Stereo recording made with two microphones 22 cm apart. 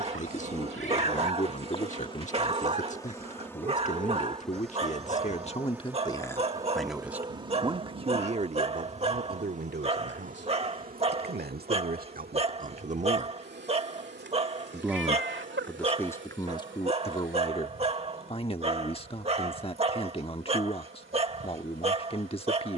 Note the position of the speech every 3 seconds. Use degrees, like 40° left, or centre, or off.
30° left, 30° left, 10° right, 50° right, 30° right, 10° left, 30° left, 30° left.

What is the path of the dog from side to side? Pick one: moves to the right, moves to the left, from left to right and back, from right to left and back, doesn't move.
doesn't move.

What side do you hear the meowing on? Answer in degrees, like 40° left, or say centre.
60° right.